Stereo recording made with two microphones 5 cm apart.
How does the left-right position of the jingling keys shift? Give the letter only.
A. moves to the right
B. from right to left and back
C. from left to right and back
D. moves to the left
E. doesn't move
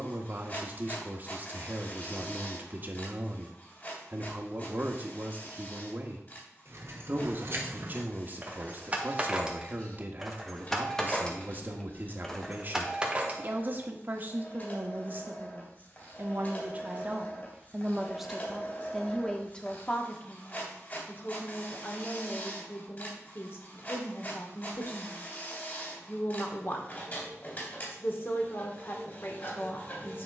B.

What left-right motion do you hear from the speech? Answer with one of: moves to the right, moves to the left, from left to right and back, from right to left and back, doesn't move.
moves to the left.